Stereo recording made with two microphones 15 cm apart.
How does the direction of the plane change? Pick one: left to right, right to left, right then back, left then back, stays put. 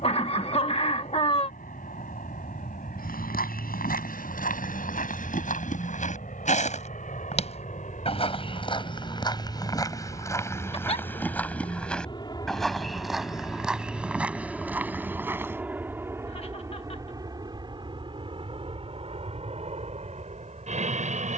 left to right.